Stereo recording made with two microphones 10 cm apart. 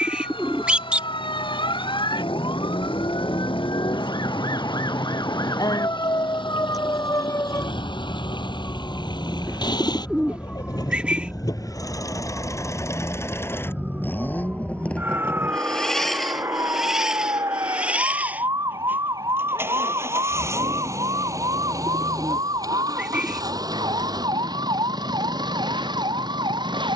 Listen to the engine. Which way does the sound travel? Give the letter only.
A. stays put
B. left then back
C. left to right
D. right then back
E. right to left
C.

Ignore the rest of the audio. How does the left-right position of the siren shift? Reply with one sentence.
You can hear the siren go from the left side to the right.